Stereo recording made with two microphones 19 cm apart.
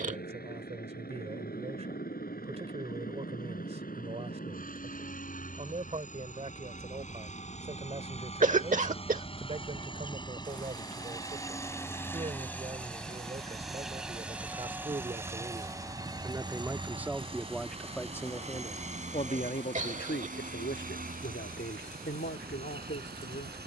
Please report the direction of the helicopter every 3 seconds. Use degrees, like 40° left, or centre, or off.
60° left, 50° left, 40° left, 20° left, centre, 20° right, 40° right, 50° right.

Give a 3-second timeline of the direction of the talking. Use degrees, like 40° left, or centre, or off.
40° right, 40° right, 40° right, 40° right, 30° right, 10° right, 40° left, 80° left.